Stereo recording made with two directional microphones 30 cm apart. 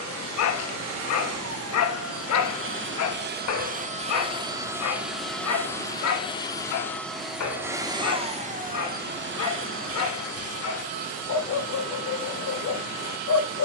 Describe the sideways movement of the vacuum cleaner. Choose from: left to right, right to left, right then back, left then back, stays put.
left then back.